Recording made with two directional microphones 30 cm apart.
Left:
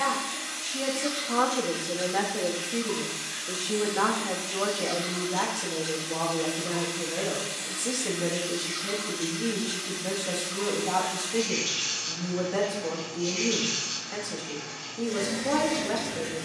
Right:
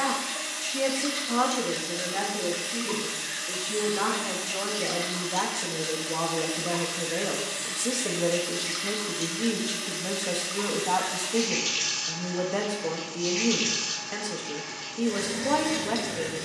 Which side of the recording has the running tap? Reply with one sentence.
In this clip you hear the running tap on the right.